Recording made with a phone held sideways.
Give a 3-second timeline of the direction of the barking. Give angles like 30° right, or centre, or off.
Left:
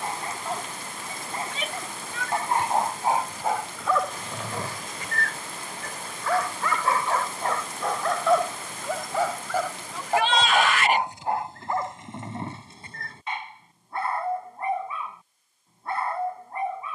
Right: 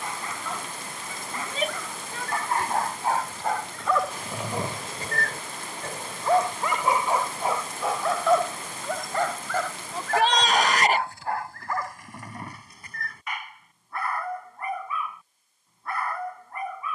30° left, 10° right, 10° right, 20° left, 30° left, 30° left.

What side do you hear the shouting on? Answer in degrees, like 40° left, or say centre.
40° right.